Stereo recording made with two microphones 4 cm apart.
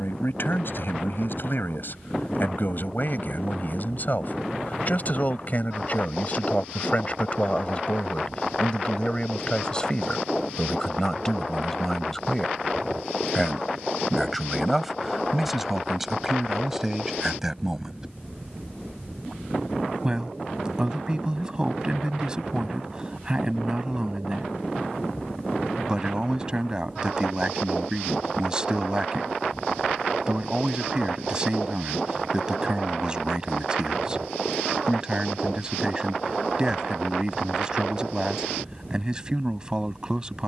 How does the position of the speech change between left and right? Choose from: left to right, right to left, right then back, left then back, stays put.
left to right.